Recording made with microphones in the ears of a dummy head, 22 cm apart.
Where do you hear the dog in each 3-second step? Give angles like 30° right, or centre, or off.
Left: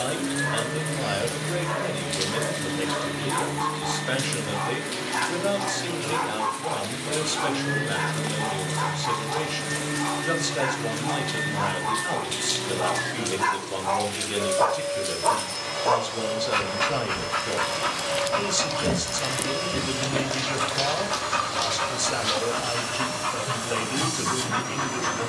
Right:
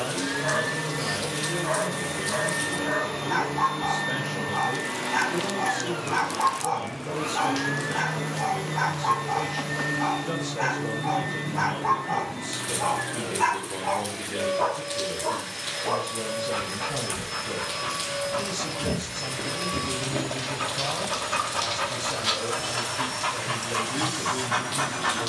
30° right, 30° right, 30° right, 30° right, 10° right, 50° left, 30° left, 10° right, 30° right.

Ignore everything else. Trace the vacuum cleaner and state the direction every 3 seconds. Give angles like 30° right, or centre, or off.
40° right, 40° right, 30° right, centre, 10° left, 20° left, 20° left, 20° left, 20° left.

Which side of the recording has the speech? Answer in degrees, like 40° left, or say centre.
60° left.